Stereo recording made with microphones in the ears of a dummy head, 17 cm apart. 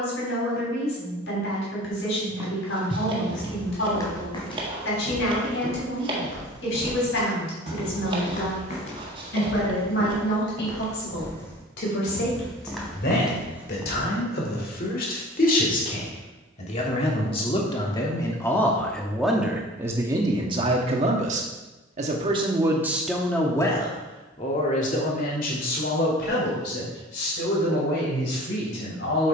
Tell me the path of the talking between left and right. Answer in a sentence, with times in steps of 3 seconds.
In this clip you hear the talking on the left from 0 s, in the centre from 18 s and on the left from 24 s.